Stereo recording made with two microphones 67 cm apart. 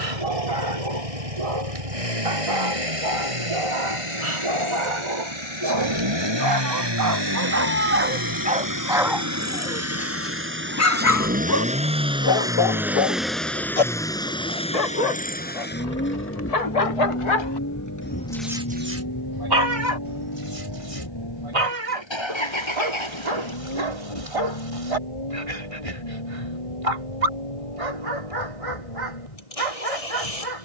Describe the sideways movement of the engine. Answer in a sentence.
You can hear the engine move from right to left.